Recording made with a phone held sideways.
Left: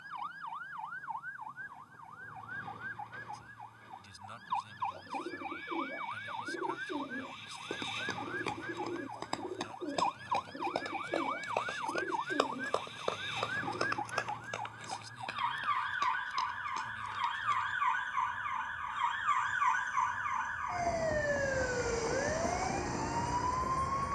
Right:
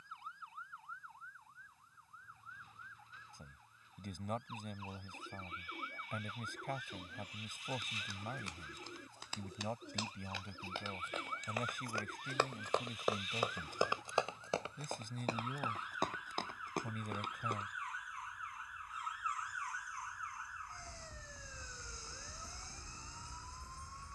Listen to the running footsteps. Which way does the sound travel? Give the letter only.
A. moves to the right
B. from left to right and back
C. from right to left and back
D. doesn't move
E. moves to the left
A.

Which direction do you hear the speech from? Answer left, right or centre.
right.